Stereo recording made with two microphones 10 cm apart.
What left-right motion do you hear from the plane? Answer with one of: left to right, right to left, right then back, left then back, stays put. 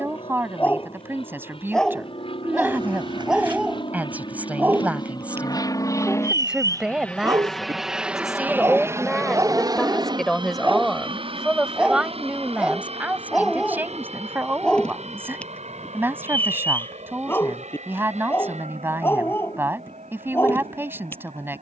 left to right.